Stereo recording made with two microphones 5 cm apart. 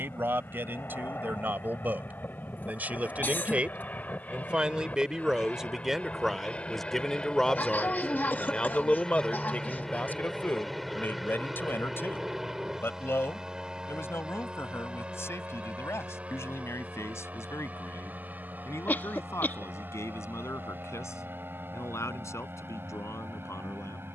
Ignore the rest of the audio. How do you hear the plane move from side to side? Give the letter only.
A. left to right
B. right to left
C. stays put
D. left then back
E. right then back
A.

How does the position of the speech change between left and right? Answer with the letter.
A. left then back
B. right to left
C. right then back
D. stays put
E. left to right
B.